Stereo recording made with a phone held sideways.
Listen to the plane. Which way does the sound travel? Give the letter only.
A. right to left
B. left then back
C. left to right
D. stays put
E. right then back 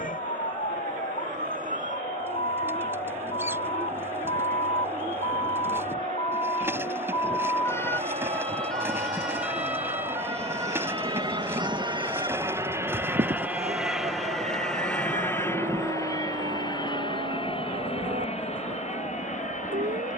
A.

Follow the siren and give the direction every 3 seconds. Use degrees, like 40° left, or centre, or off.
60° left, 50° left, 20° left, 20° right, 40° right, 60° right, 60° right.